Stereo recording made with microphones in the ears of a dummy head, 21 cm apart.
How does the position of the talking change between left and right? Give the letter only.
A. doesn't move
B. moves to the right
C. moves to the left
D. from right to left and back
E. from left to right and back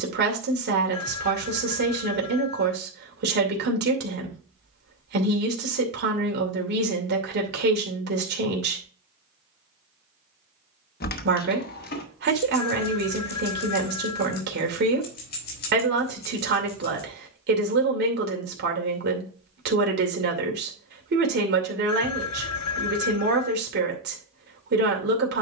A.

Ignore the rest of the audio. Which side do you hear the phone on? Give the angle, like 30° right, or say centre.
80° left.